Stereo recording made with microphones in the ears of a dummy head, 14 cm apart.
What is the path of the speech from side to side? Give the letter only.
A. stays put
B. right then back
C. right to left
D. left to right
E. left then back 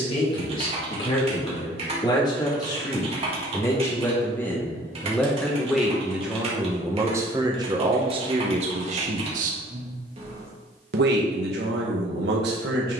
D.